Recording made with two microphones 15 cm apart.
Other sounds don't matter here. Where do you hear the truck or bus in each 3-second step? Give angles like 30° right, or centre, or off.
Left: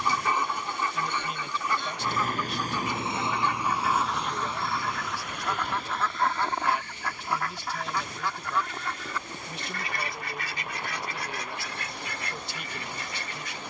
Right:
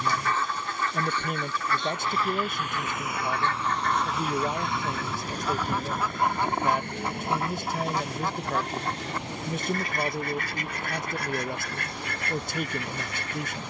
50° left, 10° right, 60° right, 70° right, 80° right.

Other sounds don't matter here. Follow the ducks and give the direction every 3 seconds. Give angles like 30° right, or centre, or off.
20° left, centre, 30° right, 50° right, 60° right.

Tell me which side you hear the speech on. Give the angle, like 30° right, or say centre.
50° right.